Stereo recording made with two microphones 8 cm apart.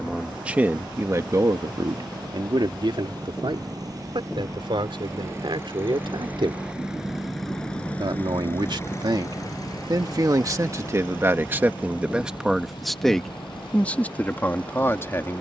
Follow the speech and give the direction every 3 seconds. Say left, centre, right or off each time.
right, right, right, right, centre.